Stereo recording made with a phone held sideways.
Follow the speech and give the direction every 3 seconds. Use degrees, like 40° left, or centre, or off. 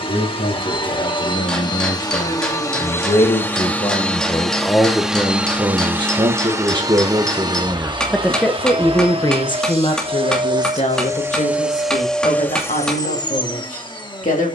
70° left, 20° left, 20° right, 50° left, 70° left.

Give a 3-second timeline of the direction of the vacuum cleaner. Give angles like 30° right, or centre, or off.
30° left, centre, 30° right, 30° right, 30° left.